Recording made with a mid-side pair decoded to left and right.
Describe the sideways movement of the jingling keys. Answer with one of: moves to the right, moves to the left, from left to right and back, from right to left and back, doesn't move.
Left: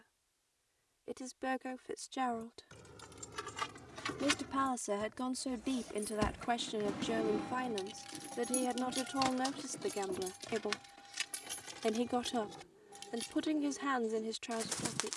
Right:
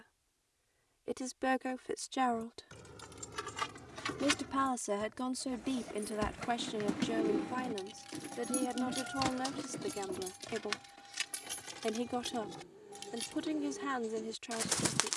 from right to left and back.